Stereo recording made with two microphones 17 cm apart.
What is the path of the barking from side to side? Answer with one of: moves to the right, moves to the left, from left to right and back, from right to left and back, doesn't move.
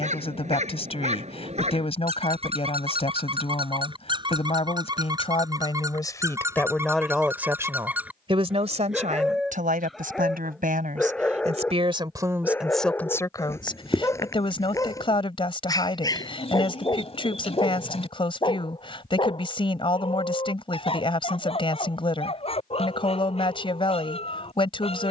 moves to the left.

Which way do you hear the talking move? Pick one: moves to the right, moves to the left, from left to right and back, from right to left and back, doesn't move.
from left to right and back.